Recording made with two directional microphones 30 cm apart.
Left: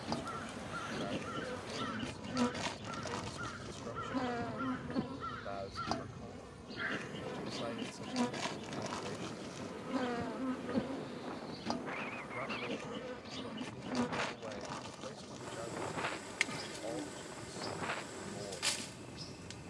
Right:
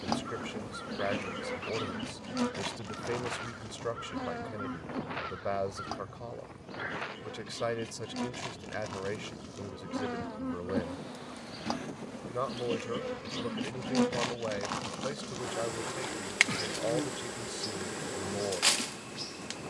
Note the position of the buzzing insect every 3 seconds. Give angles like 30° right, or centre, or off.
20° right, 10° left, 10° left, 10° right, 30° right, 50° right, 50° right.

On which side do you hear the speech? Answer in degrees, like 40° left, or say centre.
70° right.